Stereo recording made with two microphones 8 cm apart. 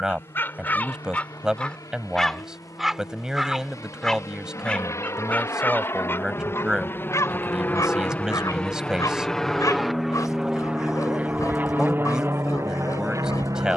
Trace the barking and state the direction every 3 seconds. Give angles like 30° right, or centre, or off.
10° left, 10° left, 40° left, 40° left, 40° left.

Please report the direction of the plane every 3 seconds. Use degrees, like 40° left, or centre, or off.
50° left, 40° left, 20° left, 10° right, 40° right.